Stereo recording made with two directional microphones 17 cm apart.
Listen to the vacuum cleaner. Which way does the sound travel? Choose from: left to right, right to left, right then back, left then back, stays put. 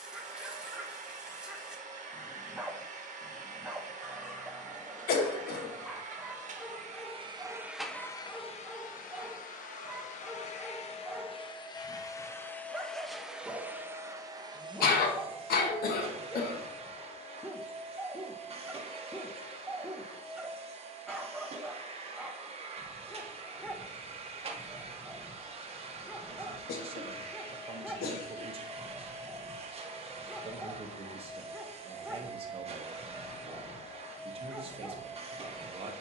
left then back.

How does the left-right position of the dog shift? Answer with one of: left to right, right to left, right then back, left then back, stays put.
stays put.